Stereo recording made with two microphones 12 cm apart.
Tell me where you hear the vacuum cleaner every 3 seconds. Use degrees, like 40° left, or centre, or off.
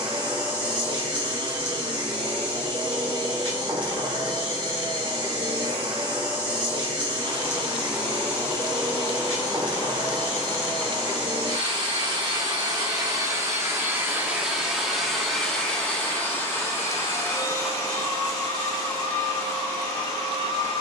40° right, 40° right, 40° right, 40° right, 20° right, 20° left, 30° left.